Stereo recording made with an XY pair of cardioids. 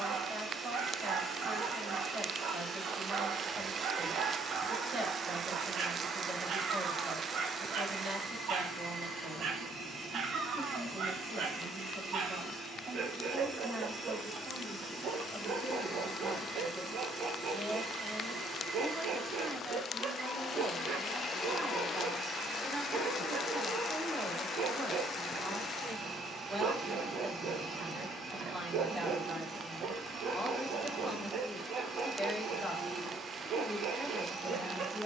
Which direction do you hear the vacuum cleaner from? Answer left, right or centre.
right.